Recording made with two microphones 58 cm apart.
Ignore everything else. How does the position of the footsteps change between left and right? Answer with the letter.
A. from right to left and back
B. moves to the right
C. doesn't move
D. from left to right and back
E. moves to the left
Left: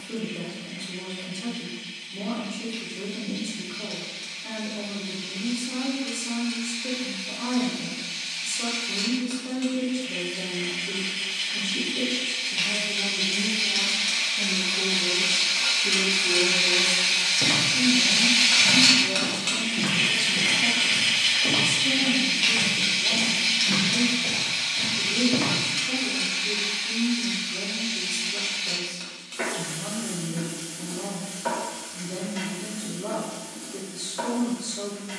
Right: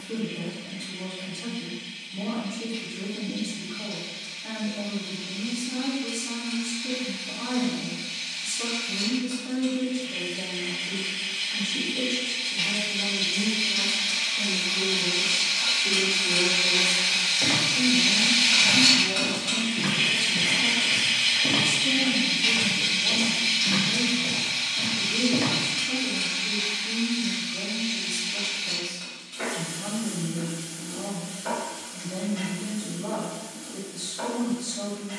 D.